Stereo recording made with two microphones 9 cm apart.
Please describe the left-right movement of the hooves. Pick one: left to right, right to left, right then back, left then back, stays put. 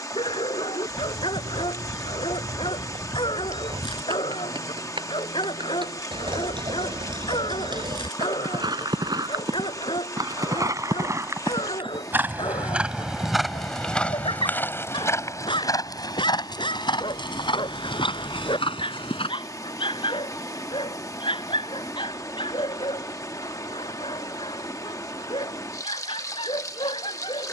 right to left.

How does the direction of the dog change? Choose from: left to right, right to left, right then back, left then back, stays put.
stays put.